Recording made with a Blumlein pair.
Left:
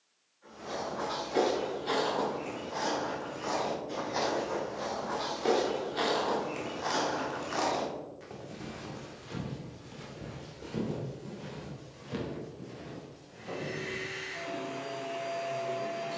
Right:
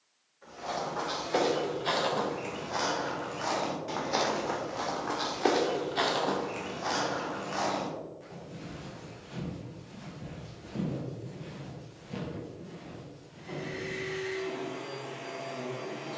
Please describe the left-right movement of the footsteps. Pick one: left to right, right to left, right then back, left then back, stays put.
right to left.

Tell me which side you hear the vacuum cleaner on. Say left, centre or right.
left.